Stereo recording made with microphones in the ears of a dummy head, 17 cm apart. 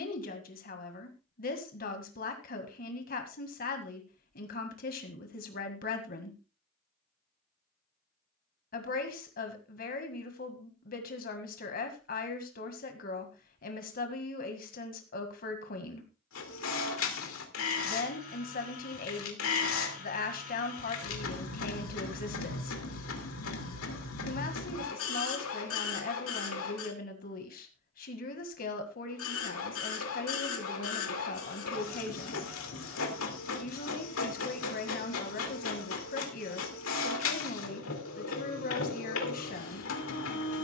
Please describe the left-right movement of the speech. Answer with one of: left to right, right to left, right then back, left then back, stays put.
stays put.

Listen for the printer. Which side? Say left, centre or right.
left.